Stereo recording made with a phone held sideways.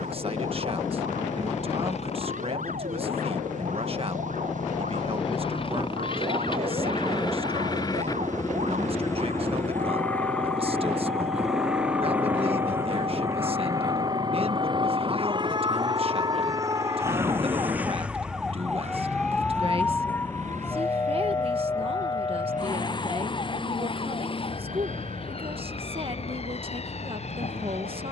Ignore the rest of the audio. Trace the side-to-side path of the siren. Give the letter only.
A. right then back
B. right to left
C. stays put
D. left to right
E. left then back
B.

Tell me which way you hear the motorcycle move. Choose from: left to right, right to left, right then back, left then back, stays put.
left to right.